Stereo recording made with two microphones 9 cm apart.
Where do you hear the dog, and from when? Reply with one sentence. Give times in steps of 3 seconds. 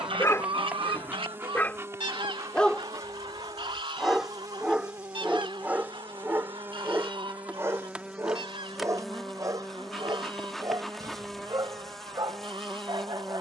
In this clip you hear the dog on the left from 0 s, in the centre from 3 s and on the right from 6 s.